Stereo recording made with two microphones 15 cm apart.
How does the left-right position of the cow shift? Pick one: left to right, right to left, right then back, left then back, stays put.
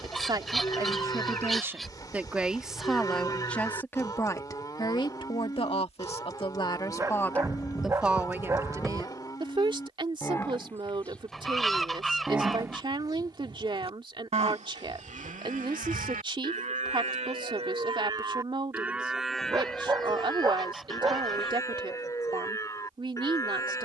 right then back.